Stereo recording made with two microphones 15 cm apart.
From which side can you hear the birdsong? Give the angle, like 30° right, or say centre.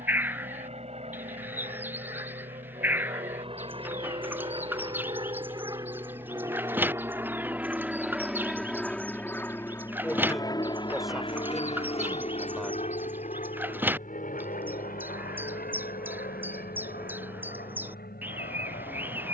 10° right.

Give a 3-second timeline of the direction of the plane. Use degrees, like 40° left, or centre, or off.
50° right, 40° right, 10° right, 30° left, 50° left, 70° left, 70° left.